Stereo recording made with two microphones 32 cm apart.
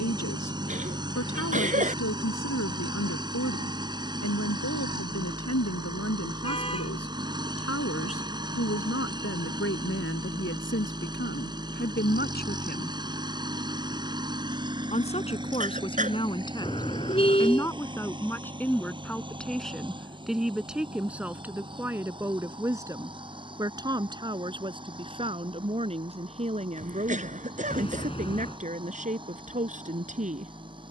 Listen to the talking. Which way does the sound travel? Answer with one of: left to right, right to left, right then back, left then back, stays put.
left to right.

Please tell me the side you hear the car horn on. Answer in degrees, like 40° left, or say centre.
20° left.